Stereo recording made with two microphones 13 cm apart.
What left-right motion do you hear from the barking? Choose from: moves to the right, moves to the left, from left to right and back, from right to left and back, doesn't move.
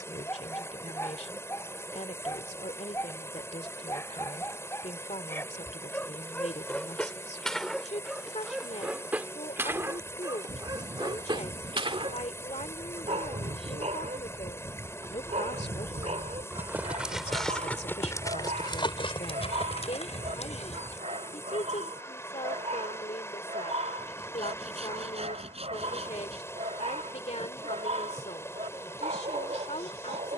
moves to the right.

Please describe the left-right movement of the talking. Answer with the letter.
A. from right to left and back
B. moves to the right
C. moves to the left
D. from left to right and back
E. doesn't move
E.